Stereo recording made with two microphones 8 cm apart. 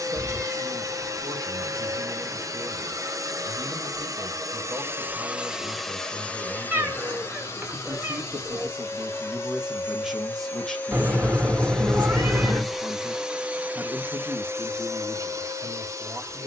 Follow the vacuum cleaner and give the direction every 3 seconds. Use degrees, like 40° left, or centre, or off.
40° right, 30° right, 30° left, 20° left, 20° right, 40° right.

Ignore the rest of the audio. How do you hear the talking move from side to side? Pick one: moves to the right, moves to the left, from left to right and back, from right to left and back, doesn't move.
from right to left and back.